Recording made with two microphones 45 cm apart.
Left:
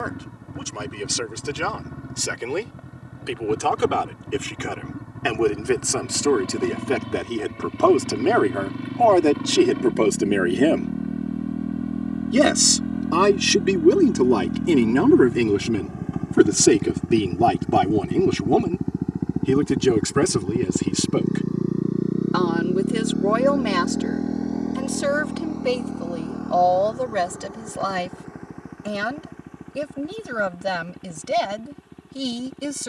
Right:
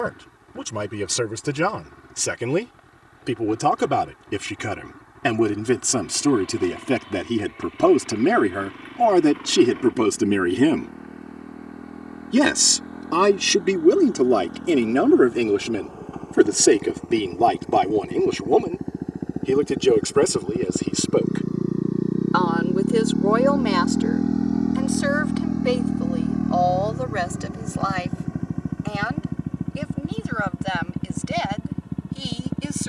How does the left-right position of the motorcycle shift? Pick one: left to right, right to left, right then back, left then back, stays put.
left to right.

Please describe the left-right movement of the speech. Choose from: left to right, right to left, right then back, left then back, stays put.
right to left.